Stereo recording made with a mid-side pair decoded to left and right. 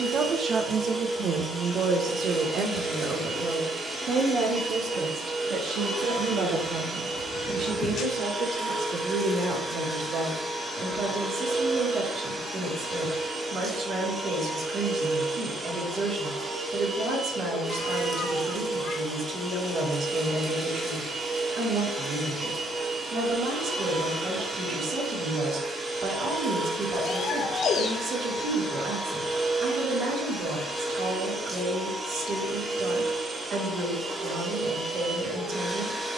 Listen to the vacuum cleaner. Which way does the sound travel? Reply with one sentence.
In this clip you hear the vacuum cleaner stay put.